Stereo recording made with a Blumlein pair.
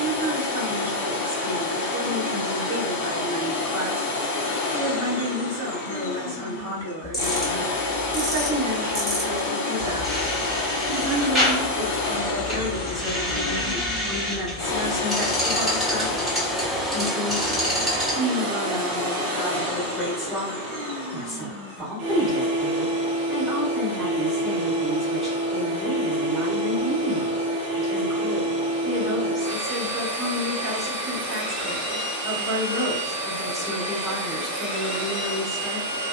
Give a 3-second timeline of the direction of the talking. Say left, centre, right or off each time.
right, right, right, right, centre, centre, centre, centre, centre, centre, centre, centre.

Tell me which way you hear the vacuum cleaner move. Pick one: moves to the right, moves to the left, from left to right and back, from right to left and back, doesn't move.
moves to the right.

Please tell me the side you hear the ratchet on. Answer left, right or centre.
centre.